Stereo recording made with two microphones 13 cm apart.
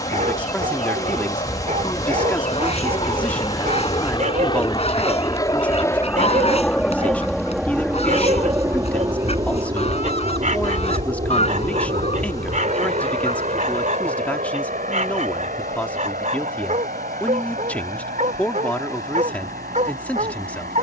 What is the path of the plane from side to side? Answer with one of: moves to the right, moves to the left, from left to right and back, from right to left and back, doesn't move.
moves to the right.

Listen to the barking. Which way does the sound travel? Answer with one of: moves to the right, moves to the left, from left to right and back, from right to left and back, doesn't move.
doesn't move.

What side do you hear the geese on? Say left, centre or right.
left.